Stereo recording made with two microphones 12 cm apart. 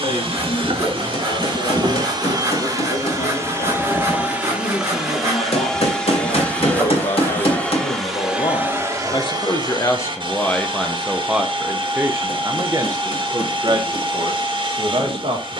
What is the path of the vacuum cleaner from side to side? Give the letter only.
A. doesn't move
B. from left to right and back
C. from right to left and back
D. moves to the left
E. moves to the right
C.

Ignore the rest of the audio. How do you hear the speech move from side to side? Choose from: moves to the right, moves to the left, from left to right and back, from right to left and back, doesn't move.
moves to the right.